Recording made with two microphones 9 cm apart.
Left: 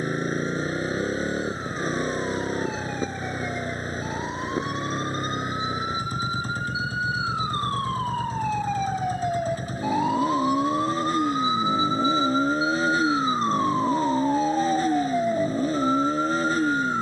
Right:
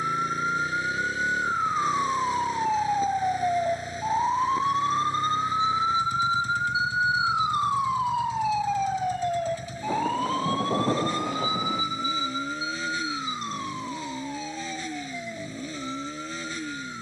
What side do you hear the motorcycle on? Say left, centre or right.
left.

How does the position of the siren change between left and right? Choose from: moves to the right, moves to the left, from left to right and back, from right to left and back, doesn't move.
moves to the left.